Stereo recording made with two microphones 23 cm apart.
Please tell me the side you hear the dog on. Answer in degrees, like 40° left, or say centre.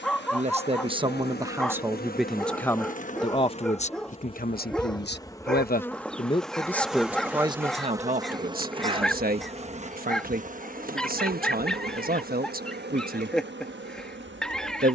centre.